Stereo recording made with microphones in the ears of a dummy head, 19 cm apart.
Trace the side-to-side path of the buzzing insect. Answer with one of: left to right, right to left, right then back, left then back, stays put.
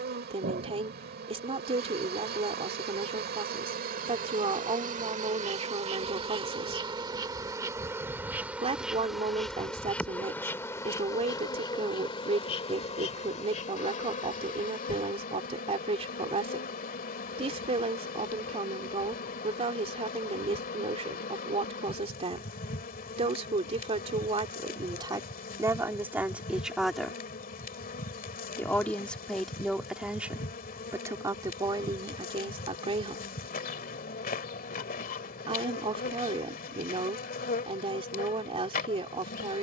right to left.